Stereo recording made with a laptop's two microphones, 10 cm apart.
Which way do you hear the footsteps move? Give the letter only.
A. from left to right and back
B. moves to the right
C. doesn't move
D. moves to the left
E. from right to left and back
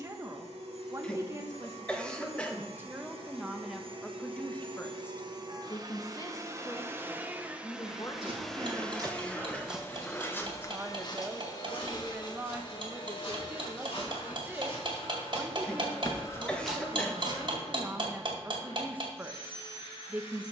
E.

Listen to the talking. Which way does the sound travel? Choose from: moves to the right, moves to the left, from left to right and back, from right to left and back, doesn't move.
from right to left and back.